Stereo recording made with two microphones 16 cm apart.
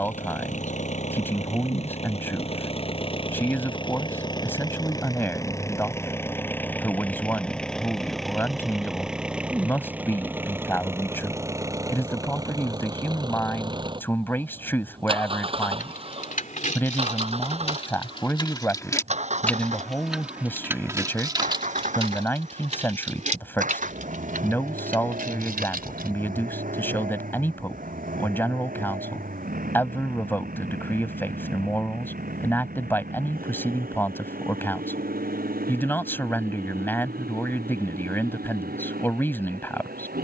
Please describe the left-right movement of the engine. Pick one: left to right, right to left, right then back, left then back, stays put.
left to right.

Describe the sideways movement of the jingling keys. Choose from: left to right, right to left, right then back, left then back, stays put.
left to right.